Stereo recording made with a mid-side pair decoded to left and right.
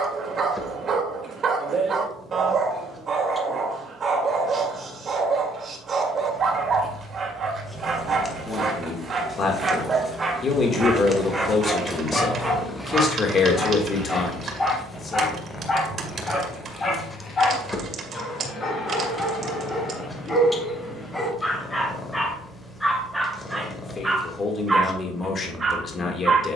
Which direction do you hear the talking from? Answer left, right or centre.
left.